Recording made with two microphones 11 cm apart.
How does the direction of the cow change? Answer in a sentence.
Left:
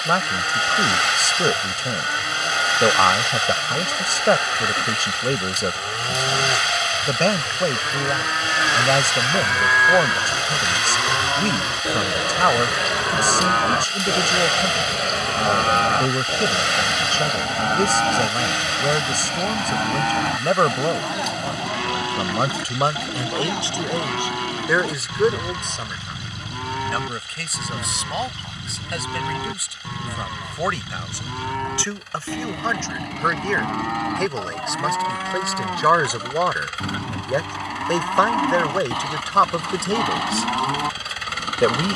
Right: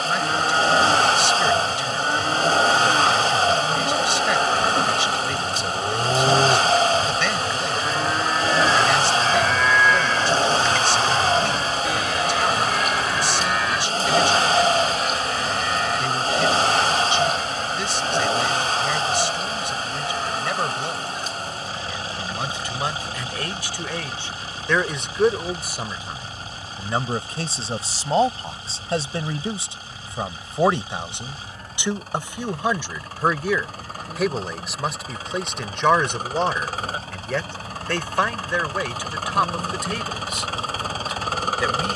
In this clip you hear the cow move from right to left.